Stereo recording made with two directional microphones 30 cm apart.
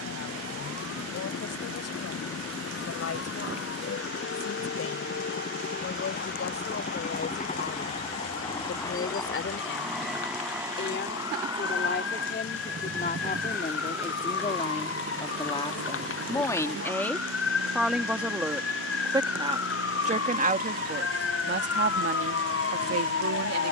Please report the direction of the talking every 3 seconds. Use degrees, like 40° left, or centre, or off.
50° left, 50° left, 40° left, 40° left, 30° left, 10° left, 20° right, 40° right.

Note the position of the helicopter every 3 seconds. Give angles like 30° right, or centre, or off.
60° left, 40° left, 20° left, 10° right, 30° right, 50° right, 60° right, 60° right.